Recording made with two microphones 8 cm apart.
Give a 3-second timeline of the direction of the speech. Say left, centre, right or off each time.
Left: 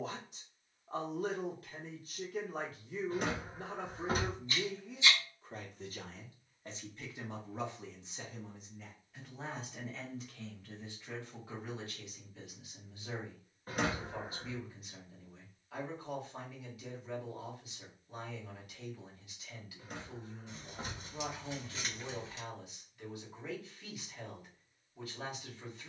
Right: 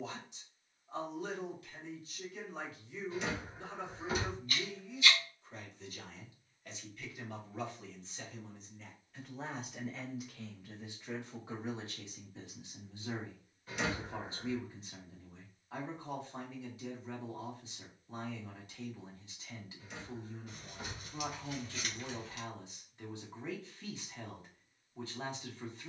left, left, left, centre, right, right, right, right, right.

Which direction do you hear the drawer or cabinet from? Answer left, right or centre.
left.